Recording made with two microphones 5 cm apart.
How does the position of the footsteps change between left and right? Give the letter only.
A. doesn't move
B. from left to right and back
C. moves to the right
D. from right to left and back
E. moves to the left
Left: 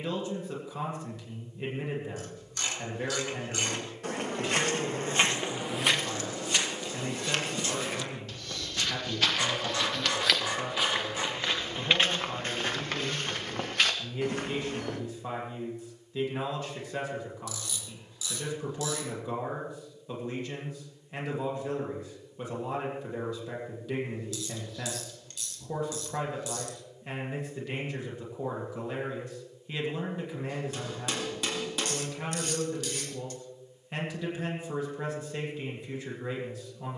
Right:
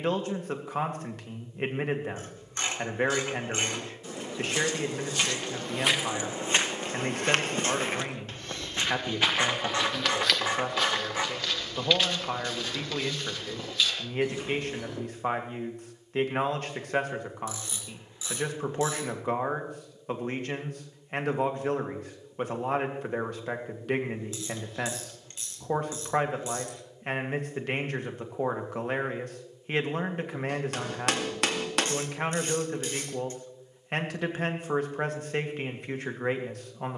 B.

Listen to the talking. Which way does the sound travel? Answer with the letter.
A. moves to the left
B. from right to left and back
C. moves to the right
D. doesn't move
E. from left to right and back
D.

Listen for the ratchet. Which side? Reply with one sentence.
You can hear the ratchet on the right.